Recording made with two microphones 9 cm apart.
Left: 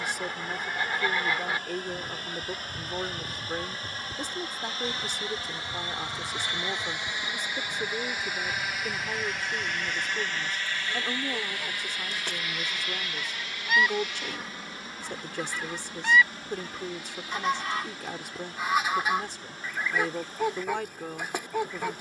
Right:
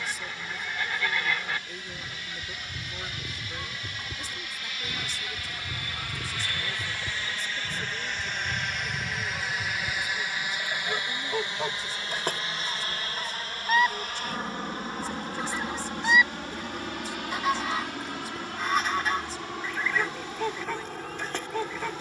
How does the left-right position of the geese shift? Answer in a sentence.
In this clip you hear the geese move from left to right and back again.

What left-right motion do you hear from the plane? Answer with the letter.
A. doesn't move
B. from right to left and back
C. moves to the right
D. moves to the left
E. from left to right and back
C.